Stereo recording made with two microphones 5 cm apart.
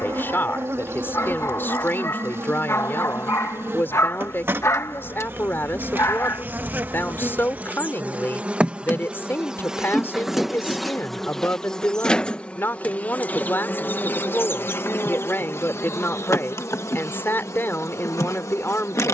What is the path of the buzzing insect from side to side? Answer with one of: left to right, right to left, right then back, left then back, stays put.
right to left.